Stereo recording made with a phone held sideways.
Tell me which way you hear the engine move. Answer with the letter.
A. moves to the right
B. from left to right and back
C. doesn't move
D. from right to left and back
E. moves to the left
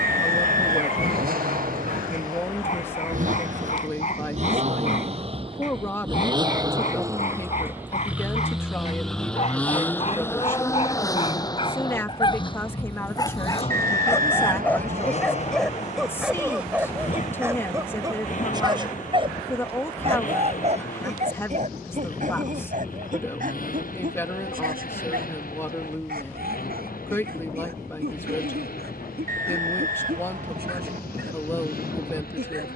E.